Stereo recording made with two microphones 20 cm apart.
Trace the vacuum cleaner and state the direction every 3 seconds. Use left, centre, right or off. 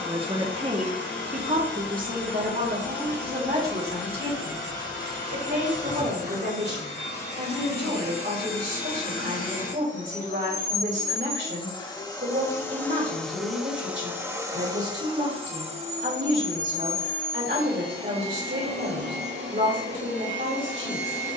left, left, left, left, centre, right, right.